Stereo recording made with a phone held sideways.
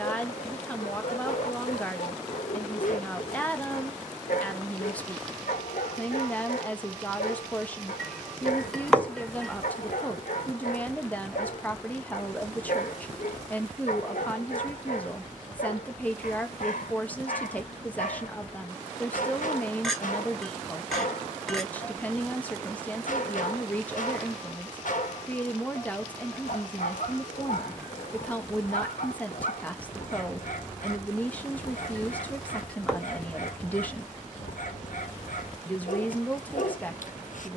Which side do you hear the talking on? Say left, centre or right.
centre.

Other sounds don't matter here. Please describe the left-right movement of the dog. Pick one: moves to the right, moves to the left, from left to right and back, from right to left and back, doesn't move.
doesn't move.